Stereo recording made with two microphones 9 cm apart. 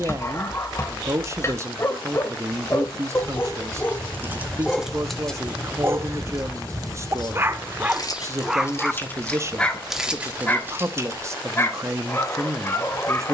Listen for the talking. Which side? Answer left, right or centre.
right.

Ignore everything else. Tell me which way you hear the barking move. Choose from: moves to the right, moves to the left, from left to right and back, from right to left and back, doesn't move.
from left to right and back.